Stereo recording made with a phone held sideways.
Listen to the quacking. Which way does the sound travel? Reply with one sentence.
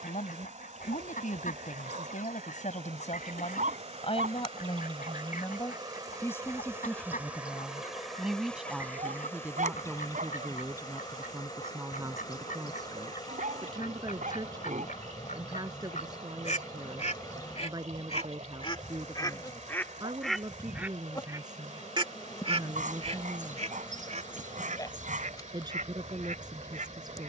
You can hear the quacking travel towards the right.